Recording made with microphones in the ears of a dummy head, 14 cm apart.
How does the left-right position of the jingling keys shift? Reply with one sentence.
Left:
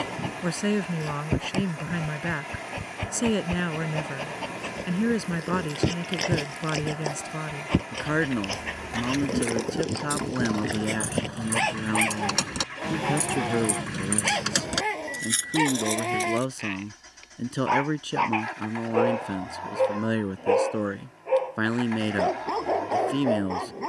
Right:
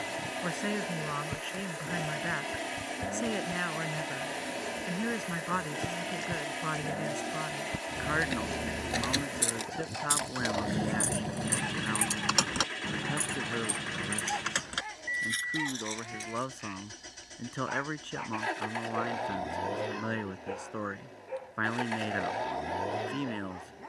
You can hear the jingling keys travel towards the left.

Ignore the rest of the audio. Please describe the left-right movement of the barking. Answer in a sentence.
You can hear the barking stay put.